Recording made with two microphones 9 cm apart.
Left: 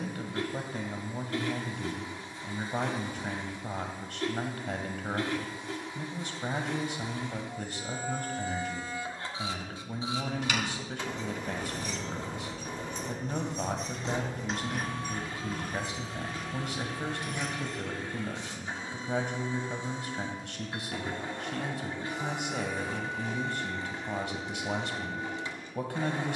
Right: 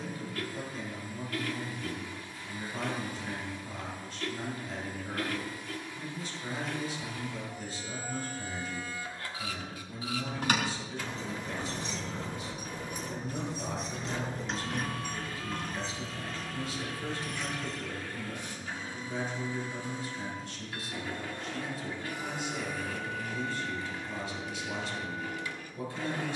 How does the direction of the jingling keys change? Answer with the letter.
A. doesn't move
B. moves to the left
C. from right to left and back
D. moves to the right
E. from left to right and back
B.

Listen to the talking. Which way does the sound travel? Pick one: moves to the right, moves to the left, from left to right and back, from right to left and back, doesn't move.
doesn't move.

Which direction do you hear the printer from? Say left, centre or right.
left.